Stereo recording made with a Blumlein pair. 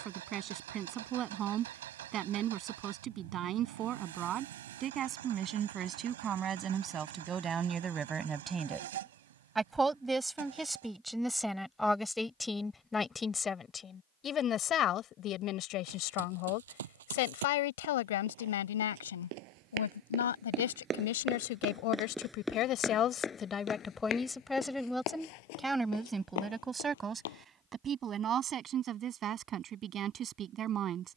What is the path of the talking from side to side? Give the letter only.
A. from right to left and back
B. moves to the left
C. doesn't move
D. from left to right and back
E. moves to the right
A.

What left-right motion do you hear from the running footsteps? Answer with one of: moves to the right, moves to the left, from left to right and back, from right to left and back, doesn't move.
moves to the left.